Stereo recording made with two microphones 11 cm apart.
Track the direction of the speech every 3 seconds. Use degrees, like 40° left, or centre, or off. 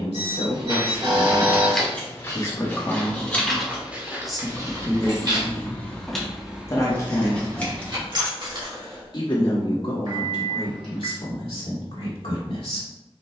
40° left, 10° left, 30° left, 50° left, 60° left.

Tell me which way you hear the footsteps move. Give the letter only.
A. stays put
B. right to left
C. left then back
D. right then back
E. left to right
C.